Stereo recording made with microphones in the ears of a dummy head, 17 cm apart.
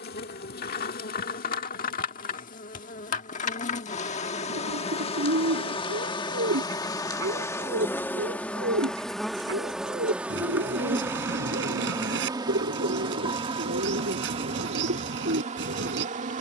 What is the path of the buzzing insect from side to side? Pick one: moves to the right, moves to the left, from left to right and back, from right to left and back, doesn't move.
moves to the right.